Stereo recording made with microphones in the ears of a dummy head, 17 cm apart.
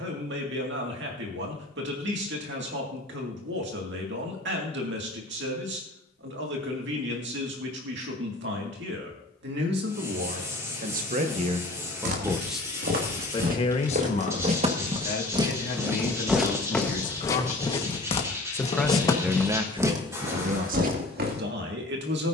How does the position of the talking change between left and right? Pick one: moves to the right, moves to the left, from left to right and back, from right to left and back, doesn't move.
from right to left and back.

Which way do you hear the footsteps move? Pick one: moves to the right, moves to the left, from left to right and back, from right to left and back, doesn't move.
from right to left and back.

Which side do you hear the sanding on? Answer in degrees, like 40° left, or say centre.
20° right.